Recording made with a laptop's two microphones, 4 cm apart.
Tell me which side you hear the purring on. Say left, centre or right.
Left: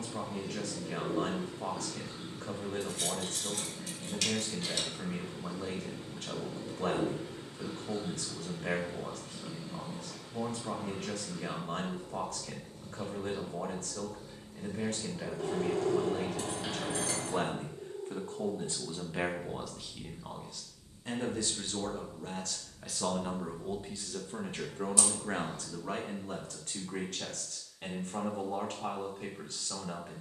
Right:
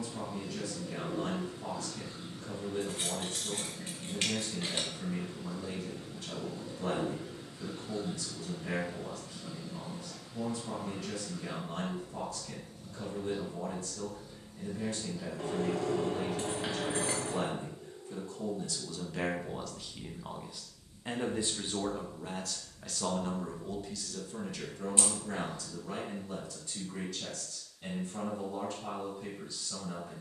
left.